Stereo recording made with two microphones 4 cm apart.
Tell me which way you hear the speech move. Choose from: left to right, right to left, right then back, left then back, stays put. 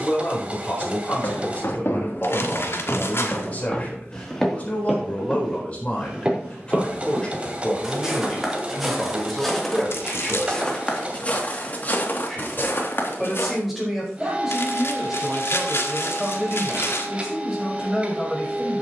left to right.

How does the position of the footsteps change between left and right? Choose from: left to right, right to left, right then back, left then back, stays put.
right then back.